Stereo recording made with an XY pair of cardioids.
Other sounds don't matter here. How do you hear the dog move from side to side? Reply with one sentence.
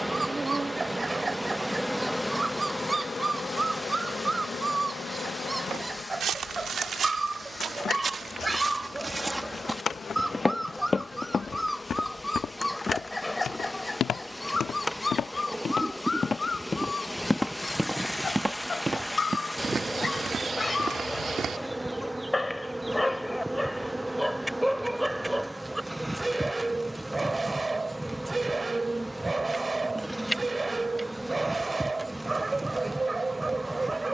You can hear the dog move from right to left and back again.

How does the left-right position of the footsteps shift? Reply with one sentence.
In this clip you hear the footsteps go left and come back.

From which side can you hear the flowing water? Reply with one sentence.
In this clip you hear the flowing water in the centre.